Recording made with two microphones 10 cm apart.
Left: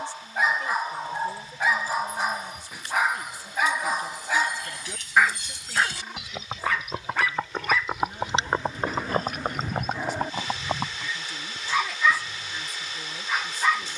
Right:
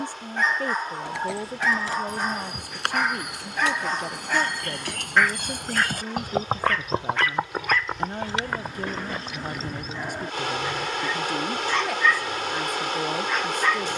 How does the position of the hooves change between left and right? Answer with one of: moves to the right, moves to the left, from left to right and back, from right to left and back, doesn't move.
moves to the left.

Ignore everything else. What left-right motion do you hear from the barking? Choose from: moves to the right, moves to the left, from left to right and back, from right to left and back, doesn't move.
doesn't move.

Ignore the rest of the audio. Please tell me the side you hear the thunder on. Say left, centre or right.
centre.